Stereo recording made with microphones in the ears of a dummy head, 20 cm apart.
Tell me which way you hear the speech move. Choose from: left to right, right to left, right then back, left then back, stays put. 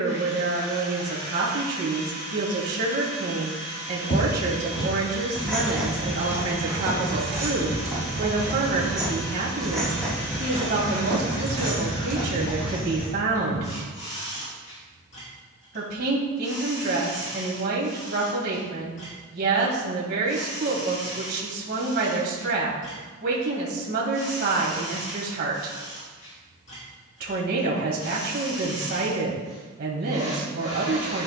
stays put.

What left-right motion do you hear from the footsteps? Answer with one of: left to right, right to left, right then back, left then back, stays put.
right then back.